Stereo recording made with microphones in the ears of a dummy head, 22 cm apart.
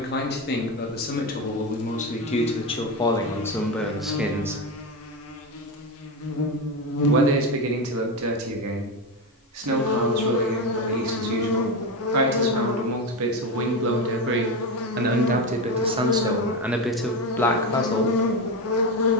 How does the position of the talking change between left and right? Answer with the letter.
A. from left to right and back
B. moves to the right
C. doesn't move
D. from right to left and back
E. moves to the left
A.